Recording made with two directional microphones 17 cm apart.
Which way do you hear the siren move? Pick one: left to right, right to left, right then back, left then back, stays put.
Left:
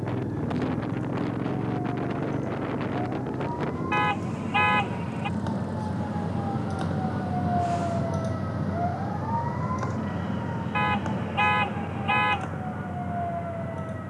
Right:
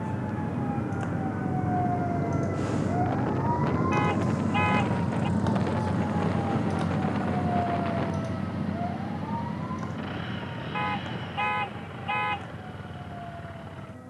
right to left.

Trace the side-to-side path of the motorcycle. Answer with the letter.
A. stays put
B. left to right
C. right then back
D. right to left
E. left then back
B.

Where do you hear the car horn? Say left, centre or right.
left.